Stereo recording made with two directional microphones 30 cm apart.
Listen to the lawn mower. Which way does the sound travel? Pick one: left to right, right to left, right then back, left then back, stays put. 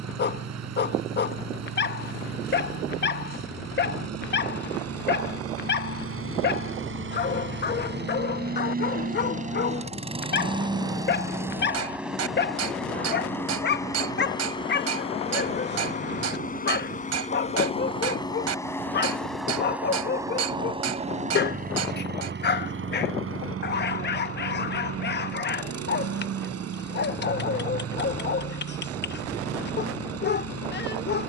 left then back.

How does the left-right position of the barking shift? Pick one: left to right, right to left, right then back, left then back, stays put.
stays put.